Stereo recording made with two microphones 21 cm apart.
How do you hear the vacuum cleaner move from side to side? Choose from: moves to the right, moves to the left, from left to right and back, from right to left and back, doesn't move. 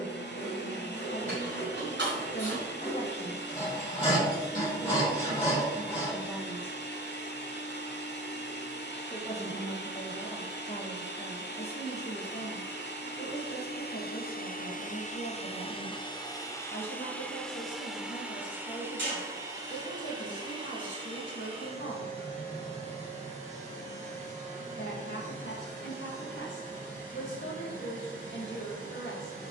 moves to the right.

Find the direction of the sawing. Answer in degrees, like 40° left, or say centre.
30° left.